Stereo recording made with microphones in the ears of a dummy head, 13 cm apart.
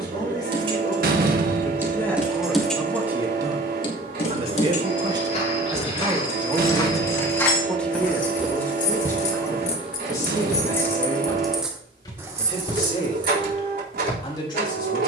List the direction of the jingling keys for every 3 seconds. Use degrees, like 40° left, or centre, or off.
10° right, 50° left, 70° left, 30° left, 30° right.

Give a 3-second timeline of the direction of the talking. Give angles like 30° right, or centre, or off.
20° left, 30° right, centre, 20° left, 30° left.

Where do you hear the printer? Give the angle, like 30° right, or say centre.
70° right.